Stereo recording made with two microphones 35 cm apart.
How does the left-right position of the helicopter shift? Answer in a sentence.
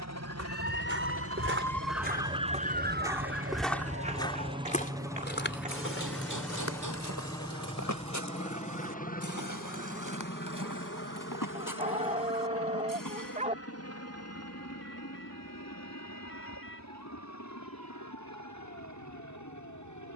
In this clip you hear the helicopter travel towards the left.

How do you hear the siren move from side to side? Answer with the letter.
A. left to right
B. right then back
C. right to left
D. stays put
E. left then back
A.